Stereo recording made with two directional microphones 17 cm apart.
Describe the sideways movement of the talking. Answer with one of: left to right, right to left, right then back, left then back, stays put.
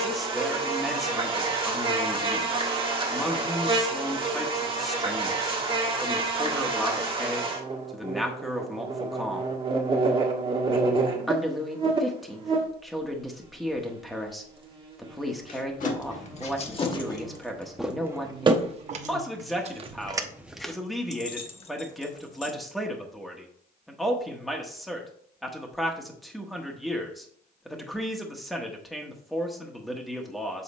stays put.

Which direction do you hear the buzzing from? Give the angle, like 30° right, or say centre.
30° right.